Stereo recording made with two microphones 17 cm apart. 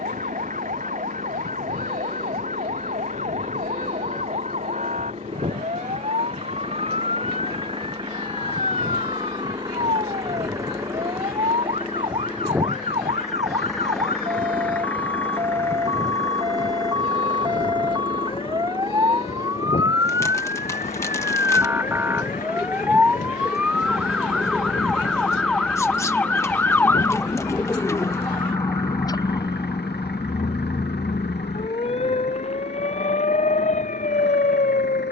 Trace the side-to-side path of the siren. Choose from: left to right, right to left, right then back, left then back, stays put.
right to left.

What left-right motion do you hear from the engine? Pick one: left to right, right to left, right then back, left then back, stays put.
right to left.